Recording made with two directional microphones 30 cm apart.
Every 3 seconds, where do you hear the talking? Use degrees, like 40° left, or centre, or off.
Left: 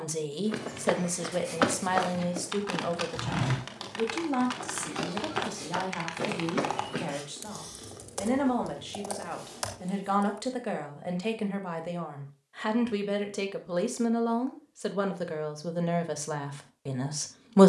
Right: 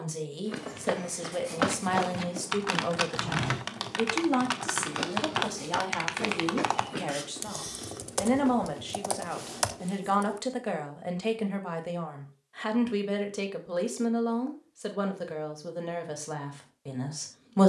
10° left, 30° right, 20° right, 10° right, centre, 20° left.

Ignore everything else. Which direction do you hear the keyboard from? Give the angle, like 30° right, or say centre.
40° right.